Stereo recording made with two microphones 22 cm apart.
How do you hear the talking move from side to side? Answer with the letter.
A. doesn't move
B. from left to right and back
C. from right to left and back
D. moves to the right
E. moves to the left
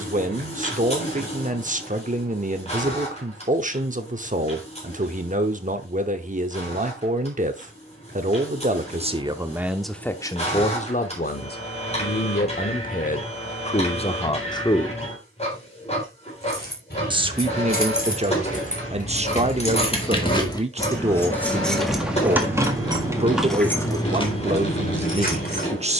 C.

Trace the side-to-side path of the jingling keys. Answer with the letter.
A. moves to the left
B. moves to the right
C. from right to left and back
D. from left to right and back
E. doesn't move
D.